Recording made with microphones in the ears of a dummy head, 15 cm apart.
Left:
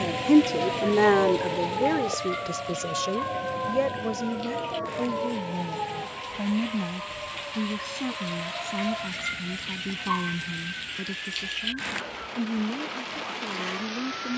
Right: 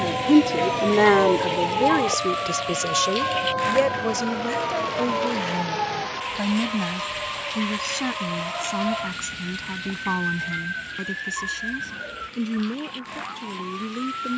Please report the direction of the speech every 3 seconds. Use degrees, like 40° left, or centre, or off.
10° right, 40° right, 50° right, 50° right, 50° right.